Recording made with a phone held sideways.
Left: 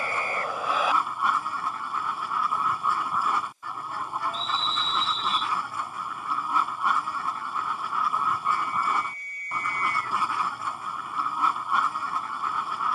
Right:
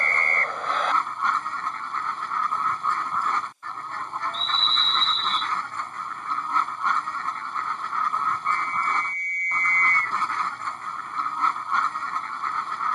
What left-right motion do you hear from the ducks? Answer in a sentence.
You can hear the ducks stay in one place.